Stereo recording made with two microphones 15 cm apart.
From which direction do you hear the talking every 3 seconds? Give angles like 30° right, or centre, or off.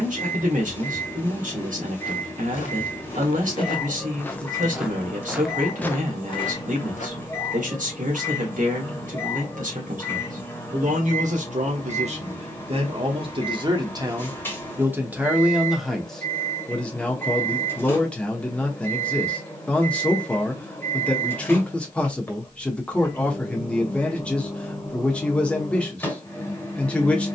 60° right, 60° right, 60° right, 60° right, 30° right, centre, 10° left, 10° left, 10° left.